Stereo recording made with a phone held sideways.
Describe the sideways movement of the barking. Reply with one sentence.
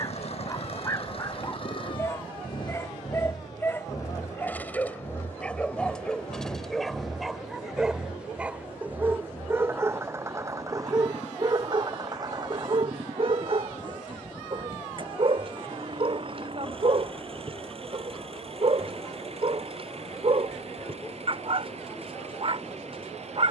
You can hear the barking travel towards the right.